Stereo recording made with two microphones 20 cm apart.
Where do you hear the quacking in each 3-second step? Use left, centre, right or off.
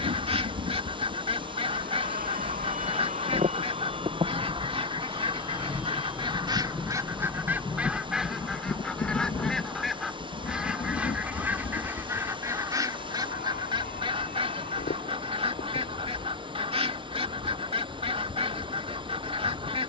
right, right, centre, centre, right, right, right.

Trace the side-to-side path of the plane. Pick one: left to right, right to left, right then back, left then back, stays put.
right to left.